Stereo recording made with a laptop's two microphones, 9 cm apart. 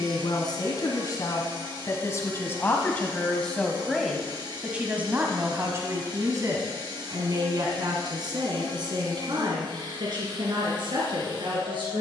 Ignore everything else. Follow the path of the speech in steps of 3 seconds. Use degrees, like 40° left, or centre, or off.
40° left, 10° right, 50° right, 60° right.